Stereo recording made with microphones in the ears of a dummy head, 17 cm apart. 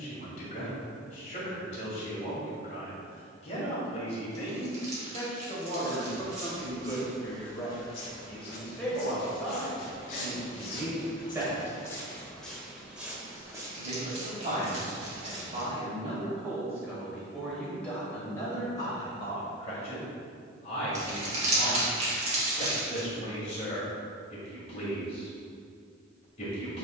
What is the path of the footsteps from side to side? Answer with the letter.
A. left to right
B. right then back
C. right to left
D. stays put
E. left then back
E.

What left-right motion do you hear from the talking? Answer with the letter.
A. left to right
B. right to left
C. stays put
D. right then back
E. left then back
D.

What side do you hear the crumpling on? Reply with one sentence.
In this clip you hear the crumpling on the right.